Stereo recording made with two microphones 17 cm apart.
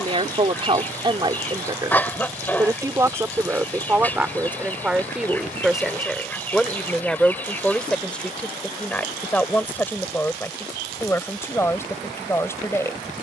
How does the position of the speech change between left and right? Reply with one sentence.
You can hear the speech move to the left.